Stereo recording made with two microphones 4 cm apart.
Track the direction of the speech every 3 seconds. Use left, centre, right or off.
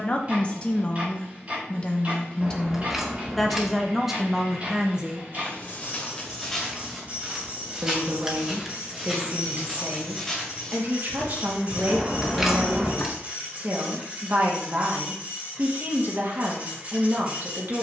left, centre, right, right, right, right.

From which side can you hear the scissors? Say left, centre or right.
centre.